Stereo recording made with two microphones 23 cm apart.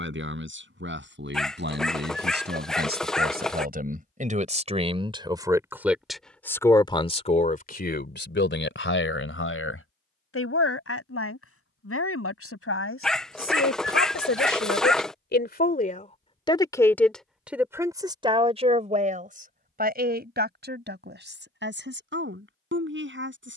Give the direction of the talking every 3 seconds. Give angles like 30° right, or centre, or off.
50° right, 30° right, 40° left, 70° left, 70° left, 20° left, 40° right, 50° right.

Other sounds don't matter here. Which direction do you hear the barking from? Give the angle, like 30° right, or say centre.
centre.